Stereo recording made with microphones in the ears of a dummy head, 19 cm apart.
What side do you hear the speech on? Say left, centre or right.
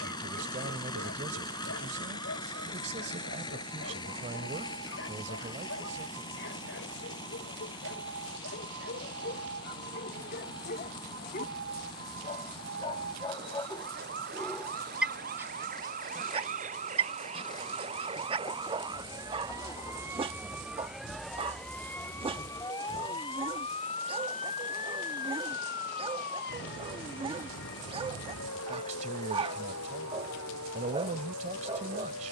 right.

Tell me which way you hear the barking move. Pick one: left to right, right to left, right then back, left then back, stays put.
left to right.